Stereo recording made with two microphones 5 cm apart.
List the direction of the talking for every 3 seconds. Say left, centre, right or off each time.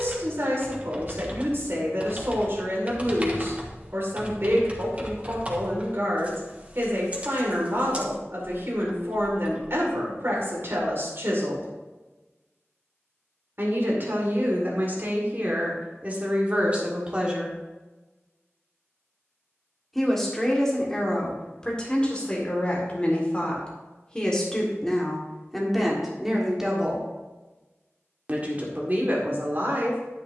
right, right, right, right, right, right, centre, left, centre, right.